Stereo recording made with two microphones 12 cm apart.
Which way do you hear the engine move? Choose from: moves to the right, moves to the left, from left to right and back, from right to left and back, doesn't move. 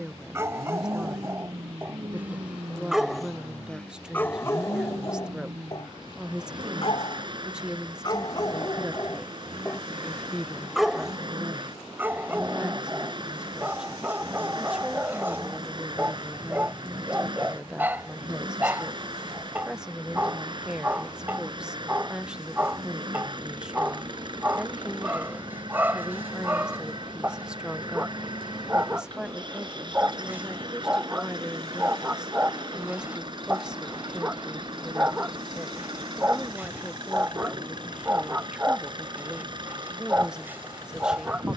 doesn't move.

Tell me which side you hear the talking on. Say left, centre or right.
centre.